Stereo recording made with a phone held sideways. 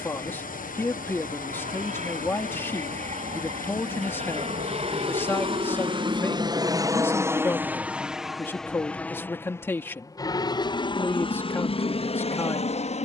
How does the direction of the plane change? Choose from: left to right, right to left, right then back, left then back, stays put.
right to left.